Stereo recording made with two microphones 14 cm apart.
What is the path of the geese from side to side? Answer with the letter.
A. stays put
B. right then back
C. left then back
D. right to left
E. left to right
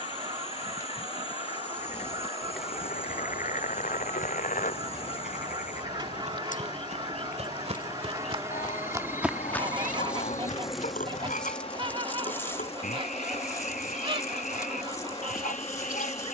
A.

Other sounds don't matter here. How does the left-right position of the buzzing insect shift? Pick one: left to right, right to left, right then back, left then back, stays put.
right then back.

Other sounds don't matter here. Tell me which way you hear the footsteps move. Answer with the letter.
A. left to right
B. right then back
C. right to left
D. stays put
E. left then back
C.